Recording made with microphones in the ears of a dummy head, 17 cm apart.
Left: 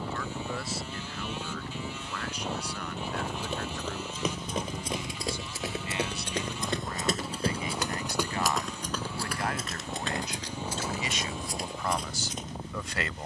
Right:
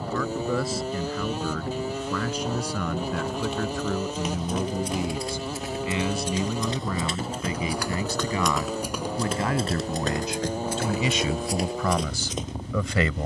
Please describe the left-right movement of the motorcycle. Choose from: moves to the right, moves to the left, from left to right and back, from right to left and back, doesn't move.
doesn't move.